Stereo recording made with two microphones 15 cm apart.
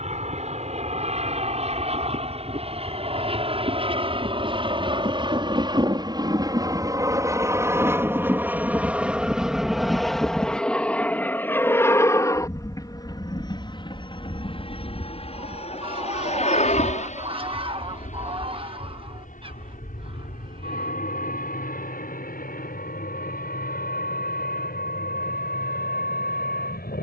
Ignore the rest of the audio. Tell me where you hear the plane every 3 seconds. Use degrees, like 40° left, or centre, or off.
50° right, 40° right, 20° right, centre, 30° left, 50° left, 60° left, 60° left, 70° left.